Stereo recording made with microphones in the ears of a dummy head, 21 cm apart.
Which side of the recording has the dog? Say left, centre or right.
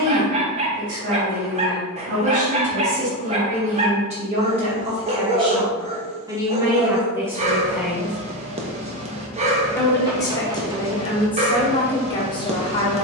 right.